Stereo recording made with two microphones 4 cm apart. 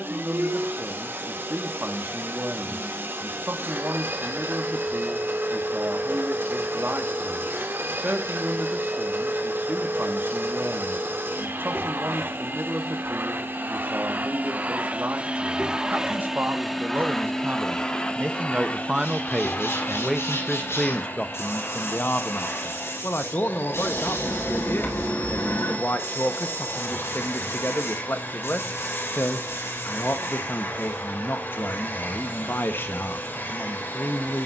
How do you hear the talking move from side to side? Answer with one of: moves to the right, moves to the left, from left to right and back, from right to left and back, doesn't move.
moves to the left.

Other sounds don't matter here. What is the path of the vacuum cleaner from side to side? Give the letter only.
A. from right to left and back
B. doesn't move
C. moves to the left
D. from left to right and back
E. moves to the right
C.